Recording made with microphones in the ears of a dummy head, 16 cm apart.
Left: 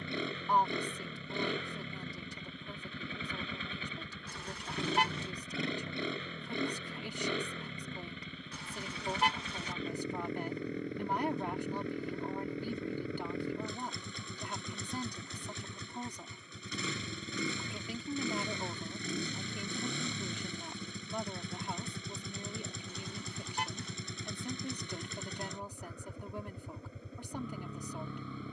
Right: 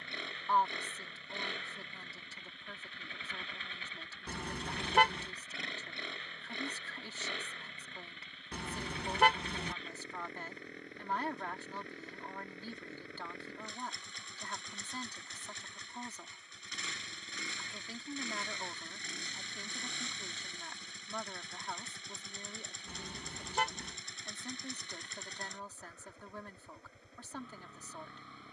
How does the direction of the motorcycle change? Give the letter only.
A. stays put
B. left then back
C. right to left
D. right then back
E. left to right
A.